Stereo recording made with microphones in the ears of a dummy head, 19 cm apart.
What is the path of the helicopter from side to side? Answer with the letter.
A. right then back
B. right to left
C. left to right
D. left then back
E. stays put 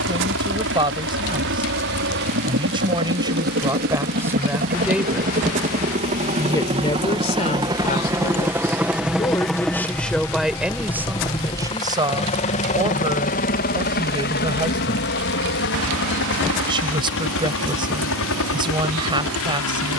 B.